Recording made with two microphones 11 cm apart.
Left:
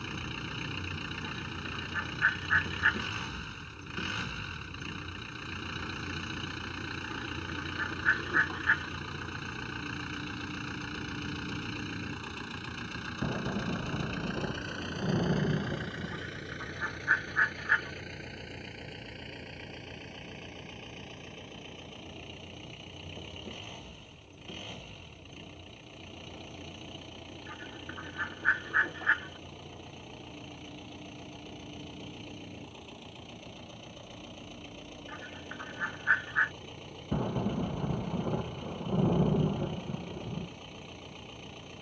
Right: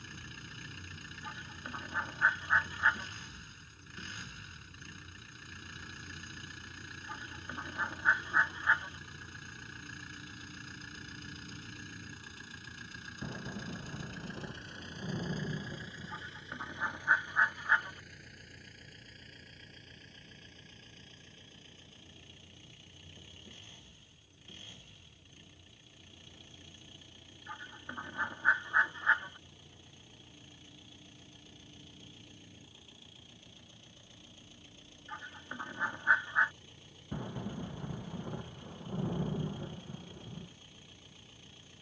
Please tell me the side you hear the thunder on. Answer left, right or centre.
left.